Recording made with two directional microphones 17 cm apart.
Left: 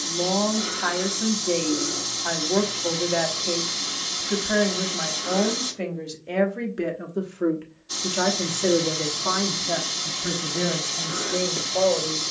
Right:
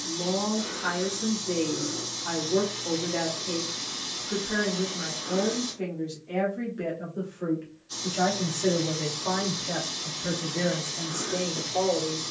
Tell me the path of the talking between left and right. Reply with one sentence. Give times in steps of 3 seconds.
You can hear the talking on the left from 0 s and in the centre from 9 s.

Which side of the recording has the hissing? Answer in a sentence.
In this clip you hear the hissing on the left.